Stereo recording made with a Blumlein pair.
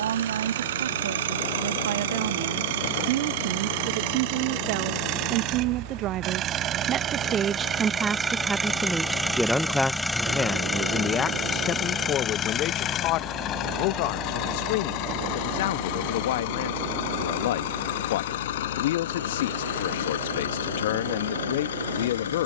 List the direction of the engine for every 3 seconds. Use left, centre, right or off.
right, right, right, centre, left, left, left, left.